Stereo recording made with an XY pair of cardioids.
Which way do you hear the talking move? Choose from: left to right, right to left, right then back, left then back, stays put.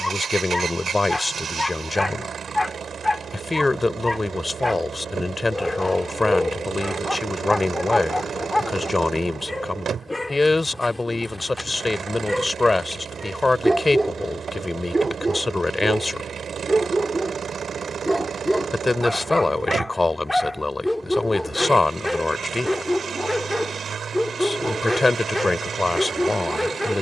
stays put.